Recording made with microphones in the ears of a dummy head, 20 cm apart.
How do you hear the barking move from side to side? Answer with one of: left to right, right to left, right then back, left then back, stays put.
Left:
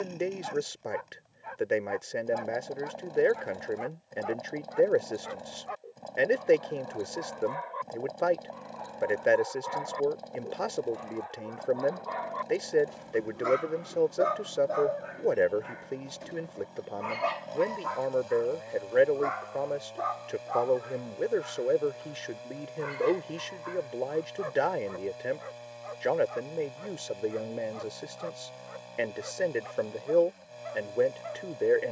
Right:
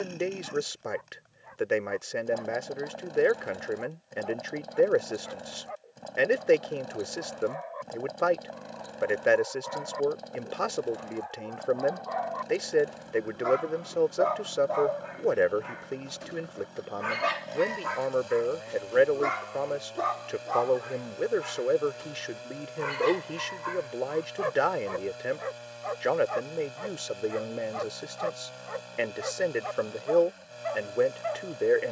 left to right.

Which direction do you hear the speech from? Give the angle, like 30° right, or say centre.
centre.